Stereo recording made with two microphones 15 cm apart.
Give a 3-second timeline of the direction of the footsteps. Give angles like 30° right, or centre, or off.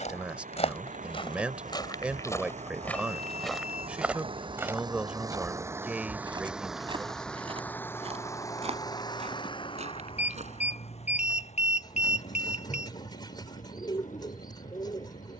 30° left, 10° right, 40° right, 50° right, off.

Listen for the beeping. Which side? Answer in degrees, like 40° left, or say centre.
50° left.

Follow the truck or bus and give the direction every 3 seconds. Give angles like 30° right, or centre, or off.
60° right, 30° right, 10° left, 40° left, 60° left.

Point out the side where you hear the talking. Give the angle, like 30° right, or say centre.
10° right.